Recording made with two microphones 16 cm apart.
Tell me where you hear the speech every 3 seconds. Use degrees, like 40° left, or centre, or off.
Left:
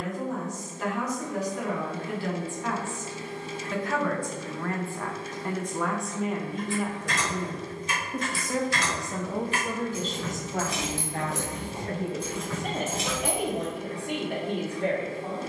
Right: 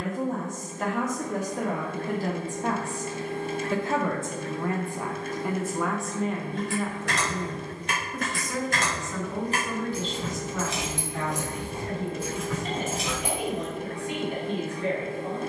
50° right, 20° right, 20° left, 50° left, 60° left.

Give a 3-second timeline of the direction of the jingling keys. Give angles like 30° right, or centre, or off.
off, off, 60° right, 20° right, centre.